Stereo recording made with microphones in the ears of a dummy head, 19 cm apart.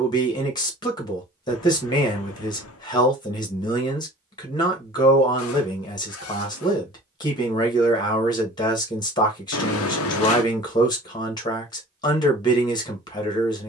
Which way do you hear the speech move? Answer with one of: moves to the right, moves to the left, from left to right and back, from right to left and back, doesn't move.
doesn't move.